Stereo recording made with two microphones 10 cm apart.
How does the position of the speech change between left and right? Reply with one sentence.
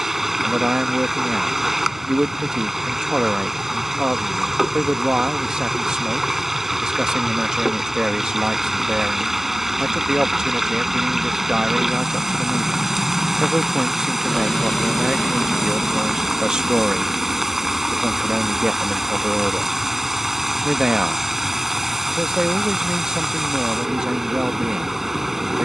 You can hear the speech stay in one place.